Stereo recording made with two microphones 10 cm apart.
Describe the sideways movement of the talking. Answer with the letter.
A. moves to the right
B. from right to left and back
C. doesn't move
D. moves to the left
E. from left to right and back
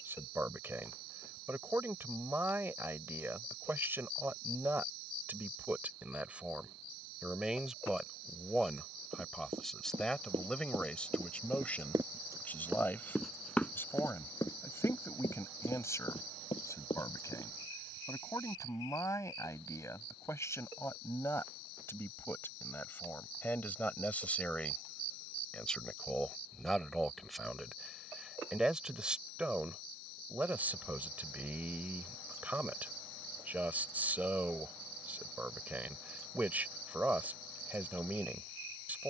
B.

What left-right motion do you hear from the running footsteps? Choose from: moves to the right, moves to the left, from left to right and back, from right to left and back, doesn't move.
moves to the left.